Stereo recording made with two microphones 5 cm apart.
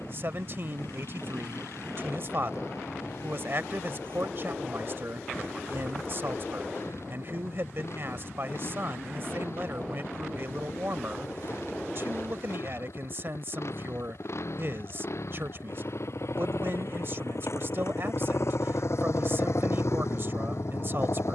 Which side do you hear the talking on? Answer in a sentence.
In this clip you hear the talking on the right.